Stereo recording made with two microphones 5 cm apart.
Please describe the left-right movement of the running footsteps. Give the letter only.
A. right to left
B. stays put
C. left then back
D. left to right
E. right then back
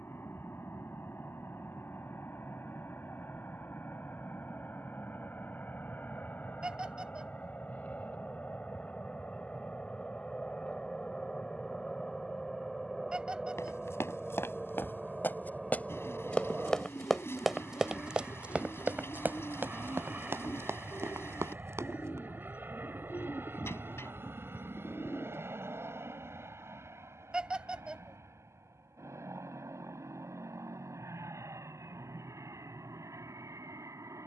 D.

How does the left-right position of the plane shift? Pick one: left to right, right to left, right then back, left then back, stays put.
left to right.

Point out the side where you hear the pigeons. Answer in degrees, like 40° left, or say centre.
50° left.